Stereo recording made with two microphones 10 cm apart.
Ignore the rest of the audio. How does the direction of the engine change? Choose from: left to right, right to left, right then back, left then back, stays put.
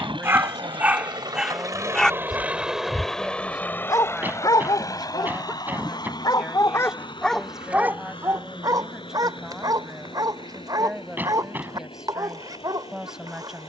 right to left.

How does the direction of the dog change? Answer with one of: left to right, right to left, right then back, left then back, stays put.
left then back.